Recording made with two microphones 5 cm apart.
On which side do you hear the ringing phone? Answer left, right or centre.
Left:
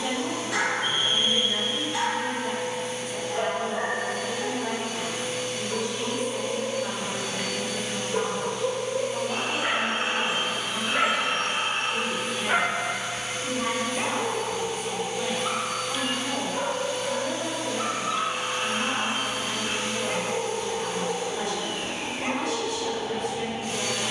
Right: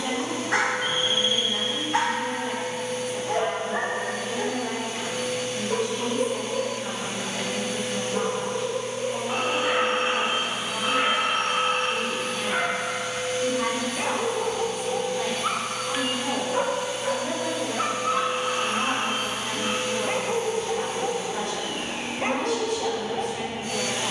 right.